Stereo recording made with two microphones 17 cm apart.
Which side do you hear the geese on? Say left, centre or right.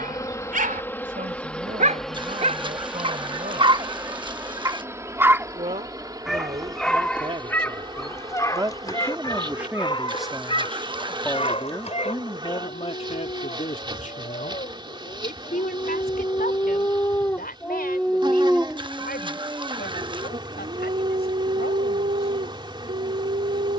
right.